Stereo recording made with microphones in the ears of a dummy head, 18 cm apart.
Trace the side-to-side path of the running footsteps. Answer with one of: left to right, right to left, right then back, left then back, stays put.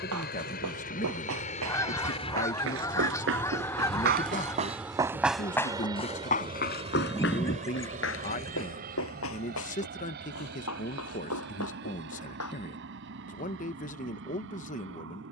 right to left.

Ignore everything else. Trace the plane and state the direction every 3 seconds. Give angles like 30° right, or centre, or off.
40° left, centre, 30° right, 50° right, 50° right.